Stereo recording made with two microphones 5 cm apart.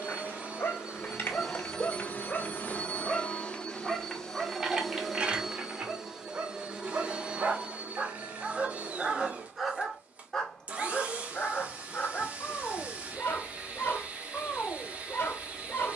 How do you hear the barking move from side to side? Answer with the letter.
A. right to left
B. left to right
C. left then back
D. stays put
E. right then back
E.